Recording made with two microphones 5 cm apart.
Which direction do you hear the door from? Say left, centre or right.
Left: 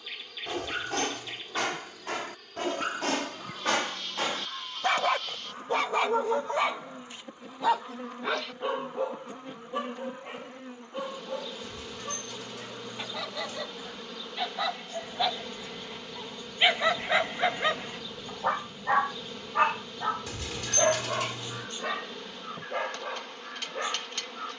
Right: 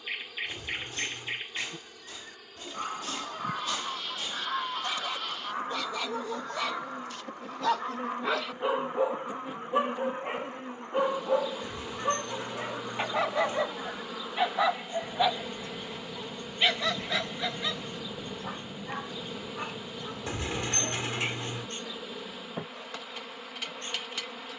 right.